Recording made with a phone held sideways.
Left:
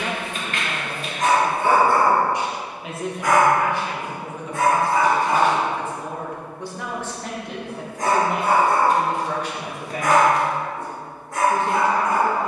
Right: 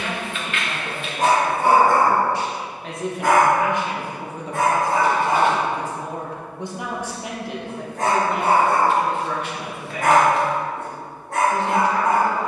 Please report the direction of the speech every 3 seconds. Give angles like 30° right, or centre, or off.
30° left, 30° right, centre, 40° left.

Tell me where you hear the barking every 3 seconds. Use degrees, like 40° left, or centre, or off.
30° right, 60° right, 70° right, 70° right.